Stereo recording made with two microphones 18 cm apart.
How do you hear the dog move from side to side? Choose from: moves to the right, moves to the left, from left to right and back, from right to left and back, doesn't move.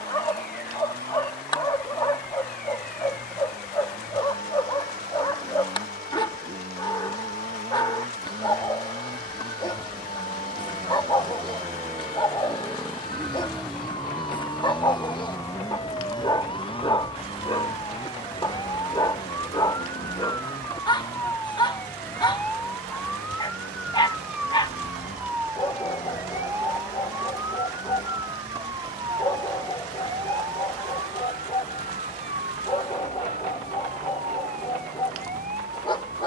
doesn't move.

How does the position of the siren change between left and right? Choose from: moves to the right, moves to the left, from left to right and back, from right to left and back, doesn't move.
moves to the right.